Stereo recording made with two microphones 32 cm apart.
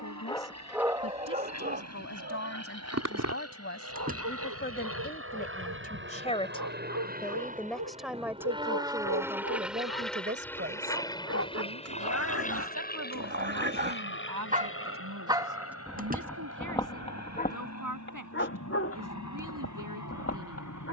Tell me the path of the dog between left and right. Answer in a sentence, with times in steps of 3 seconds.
You can hear the dog on the right from 0 s, in the centre from 15 s and on the left from 18 s.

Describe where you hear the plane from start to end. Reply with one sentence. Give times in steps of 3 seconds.
You can hear the plane on the right from 0 s, in the centre from 9 s and on the left from 12 s.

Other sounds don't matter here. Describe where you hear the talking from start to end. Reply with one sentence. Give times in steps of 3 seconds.
In this clip you hear the talking on the left from 0 s, in the centre from 6 s and on the right from 9 s.